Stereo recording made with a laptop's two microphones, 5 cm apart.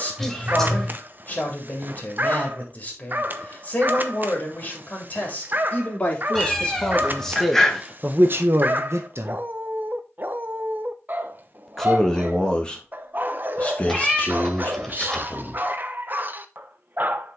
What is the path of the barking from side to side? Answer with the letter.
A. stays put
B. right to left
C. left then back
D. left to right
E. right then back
A.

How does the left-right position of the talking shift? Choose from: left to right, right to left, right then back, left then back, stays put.
right then back.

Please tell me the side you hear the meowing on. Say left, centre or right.
centre.